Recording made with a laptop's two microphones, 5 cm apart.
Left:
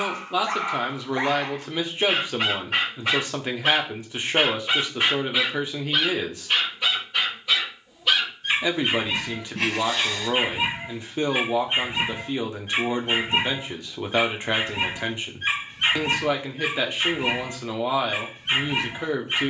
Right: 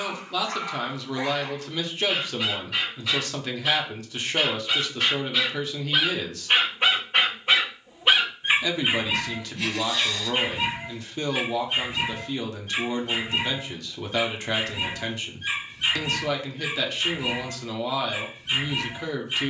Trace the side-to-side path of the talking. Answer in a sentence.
In this clip you hear the talking stay in one place.